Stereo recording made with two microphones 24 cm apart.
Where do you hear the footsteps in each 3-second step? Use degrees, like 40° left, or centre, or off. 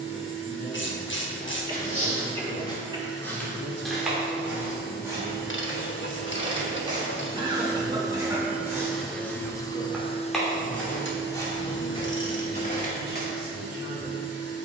30° left, 10° right, 20° right, 10° left, 30° left.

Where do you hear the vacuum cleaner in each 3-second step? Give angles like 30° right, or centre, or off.
50° right, 40° right, 20° right, 30° left, 70° left.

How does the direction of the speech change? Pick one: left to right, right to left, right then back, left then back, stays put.
right to left.